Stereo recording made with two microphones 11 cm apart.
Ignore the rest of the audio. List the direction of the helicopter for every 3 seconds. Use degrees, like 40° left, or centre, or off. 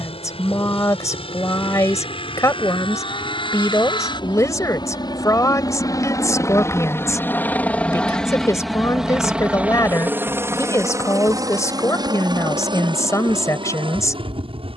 60° left, 40° left, 20° left, 20° right, 50° right.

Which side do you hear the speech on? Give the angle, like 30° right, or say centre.
30° left.